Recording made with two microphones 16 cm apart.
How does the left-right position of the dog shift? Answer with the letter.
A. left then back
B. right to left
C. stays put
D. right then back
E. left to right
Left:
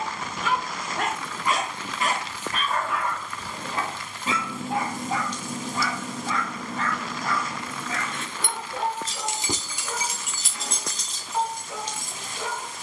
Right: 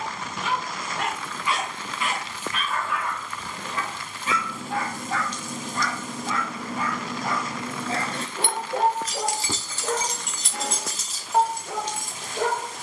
E.